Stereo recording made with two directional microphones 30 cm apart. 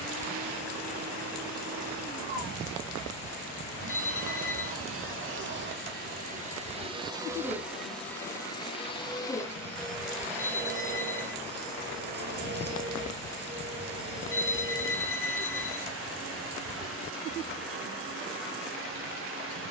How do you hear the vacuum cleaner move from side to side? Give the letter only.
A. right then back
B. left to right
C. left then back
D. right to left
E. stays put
C.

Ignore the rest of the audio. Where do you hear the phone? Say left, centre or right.
centre.